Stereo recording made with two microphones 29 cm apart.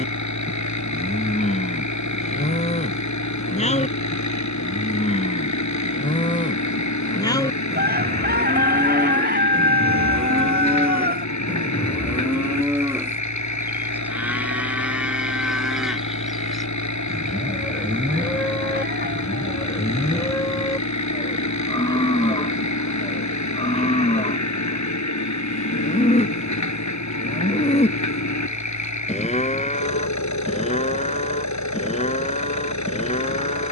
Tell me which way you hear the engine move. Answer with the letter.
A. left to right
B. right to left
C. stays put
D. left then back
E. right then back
C.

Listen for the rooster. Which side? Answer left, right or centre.
right.